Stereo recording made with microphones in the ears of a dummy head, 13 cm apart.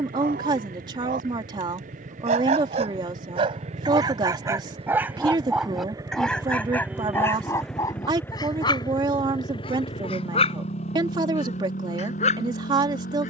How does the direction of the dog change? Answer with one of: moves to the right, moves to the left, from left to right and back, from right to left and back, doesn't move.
moves to the left.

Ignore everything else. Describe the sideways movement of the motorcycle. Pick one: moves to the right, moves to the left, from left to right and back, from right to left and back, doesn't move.
moves to the left.